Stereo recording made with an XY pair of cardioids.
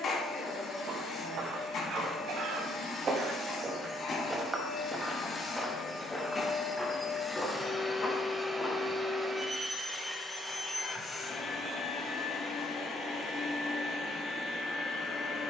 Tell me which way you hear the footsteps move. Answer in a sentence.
You can hear the footsteps travel towards the left.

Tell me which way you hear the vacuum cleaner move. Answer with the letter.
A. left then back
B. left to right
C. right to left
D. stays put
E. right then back
E.